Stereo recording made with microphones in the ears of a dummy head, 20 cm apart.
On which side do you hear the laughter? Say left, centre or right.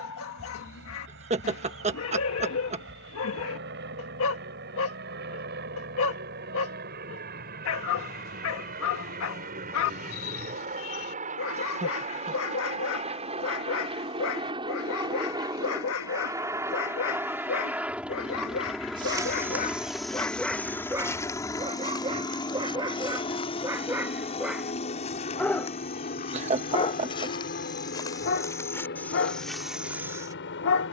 right.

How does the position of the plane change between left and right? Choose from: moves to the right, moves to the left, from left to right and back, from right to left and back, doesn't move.
moves to the left.